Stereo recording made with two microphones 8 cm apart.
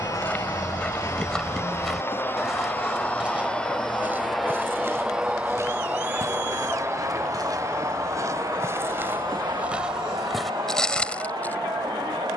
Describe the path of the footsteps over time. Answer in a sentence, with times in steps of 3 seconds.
In this clip you hear the footsteps in the centre from 0 s, on the right from 3 s and in the centre from 9 s.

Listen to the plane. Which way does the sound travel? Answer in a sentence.
You can hear the plane move from left to right.